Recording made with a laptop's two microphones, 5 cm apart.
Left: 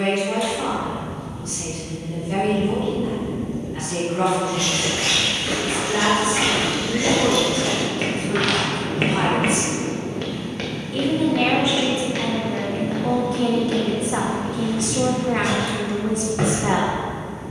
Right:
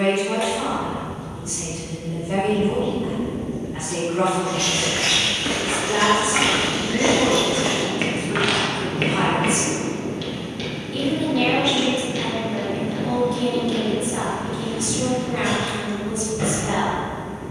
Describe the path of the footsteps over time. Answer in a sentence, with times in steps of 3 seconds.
You can hear the footsteps not at all from 0 s, on the right from 3 s and on the left from 9 s.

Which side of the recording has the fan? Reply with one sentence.
In this clip you hear the fan on the right.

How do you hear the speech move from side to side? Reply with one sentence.
In this clip you hear the speech move from right to left.